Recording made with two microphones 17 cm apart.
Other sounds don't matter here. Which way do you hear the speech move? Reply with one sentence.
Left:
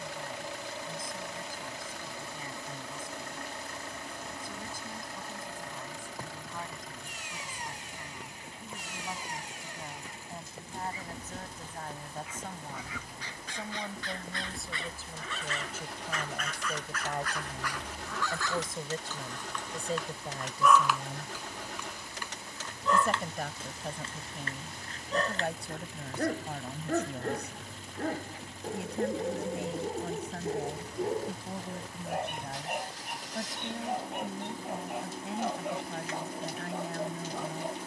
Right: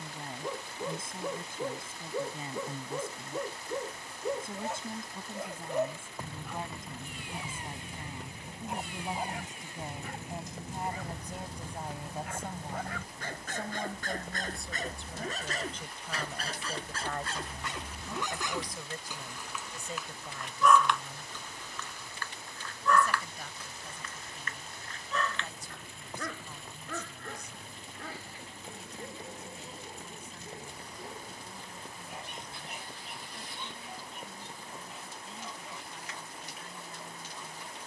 You can hear the speech travel towards the left.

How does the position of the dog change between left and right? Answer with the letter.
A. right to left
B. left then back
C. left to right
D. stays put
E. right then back
A.